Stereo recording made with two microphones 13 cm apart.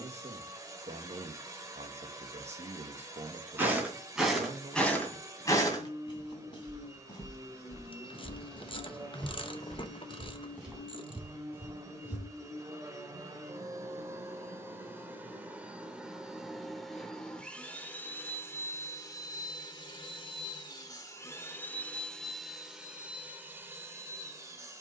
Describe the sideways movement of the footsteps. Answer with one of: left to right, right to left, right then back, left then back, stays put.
left then back.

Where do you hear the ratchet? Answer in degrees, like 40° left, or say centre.
40° left.